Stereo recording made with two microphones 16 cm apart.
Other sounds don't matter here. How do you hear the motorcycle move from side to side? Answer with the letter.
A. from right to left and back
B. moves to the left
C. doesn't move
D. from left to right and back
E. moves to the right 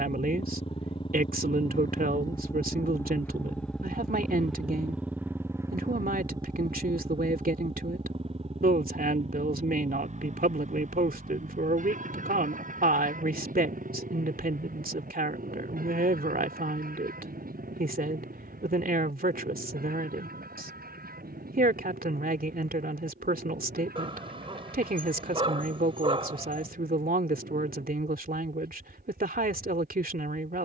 E.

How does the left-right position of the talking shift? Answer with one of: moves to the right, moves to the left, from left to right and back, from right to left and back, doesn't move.
doesn't move.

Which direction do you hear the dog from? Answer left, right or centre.
right.